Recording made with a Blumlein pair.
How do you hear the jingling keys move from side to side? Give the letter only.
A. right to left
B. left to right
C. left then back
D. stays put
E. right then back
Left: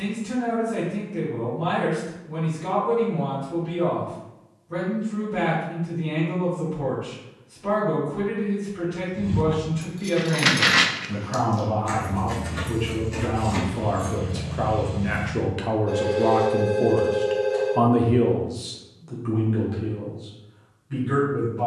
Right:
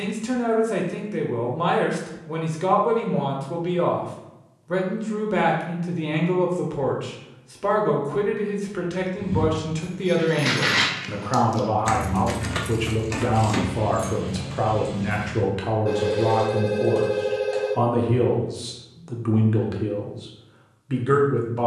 B.